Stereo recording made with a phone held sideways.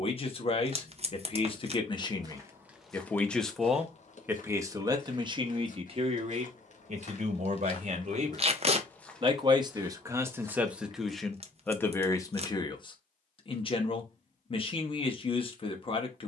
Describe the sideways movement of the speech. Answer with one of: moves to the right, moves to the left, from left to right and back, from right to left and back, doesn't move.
from left to right and back.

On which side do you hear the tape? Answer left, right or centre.
right.